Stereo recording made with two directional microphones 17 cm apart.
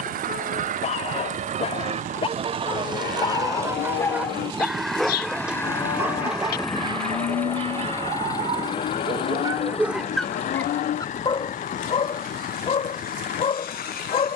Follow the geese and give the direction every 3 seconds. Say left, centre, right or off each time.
right, centre, left, left, left.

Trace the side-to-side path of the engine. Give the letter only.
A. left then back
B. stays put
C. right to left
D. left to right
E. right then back
C.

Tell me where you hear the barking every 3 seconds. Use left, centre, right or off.
left, centre, right, centre, left.